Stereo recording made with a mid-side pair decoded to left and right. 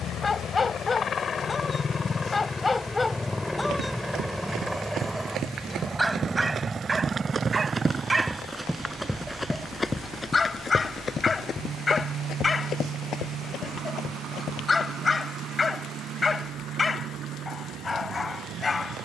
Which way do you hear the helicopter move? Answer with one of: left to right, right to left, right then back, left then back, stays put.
left to right.